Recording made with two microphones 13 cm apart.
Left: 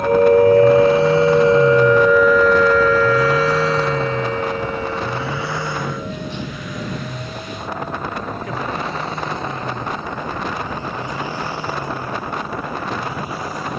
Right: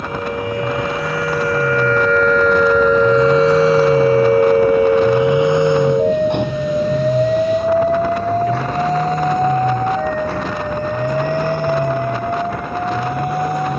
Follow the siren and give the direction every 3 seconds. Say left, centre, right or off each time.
left, right, right, right, right.